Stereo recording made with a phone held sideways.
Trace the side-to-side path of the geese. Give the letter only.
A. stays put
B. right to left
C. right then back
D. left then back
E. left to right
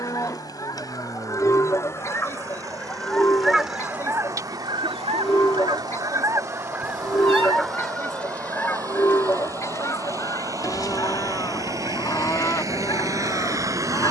C.